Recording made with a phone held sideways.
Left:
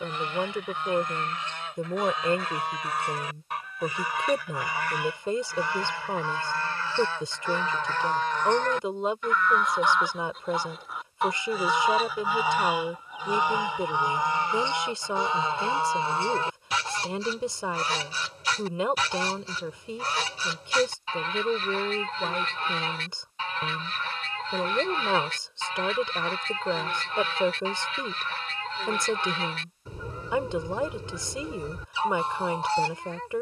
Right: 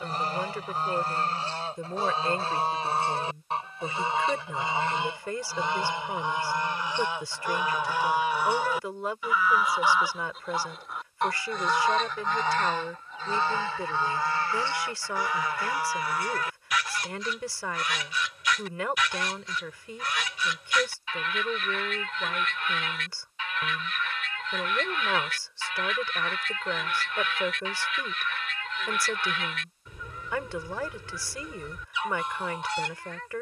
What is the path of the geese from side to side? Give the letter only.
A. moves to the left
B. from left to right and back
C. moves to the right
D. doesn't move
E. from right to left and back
A.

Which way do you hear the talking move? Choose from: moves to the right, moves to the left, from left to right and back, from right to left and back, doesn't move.
doesn't move.